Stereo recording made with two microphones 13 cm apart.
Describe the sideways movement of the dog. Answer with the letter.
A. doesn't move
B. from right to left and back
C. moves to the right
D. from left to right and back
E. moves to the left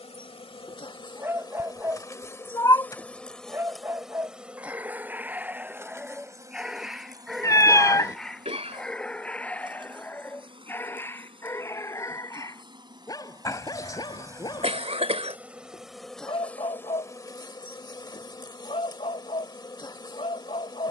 E.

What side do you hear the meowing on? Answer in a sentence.
You can hear the meowing on the left.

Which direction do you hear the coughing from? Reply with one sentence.
In this clip you hear the coughing on the right.